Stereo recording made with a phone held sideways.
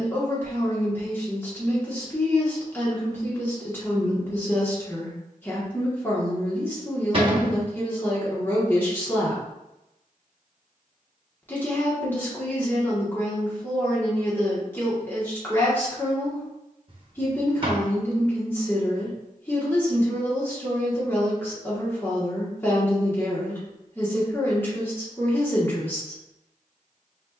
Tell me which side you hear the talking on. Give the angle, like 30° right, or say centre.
10° left.